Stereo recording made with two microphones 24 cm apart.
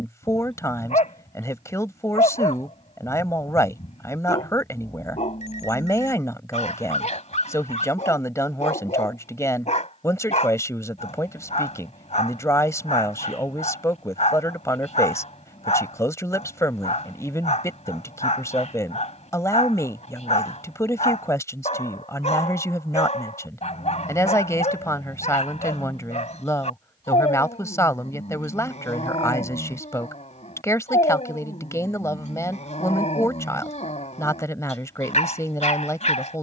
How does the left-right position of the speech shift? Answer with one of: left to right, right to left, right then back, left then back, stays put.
stays put.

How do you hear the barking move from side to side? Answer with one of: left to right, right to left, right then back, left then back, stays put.
stays put.